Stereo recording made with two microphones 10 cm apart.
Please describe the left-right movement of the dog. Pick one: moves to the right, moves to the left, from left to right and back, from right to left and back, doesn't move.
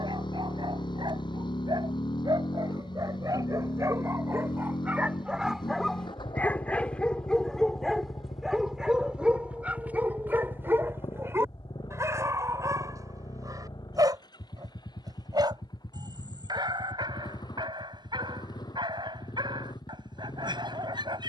from right to left and back.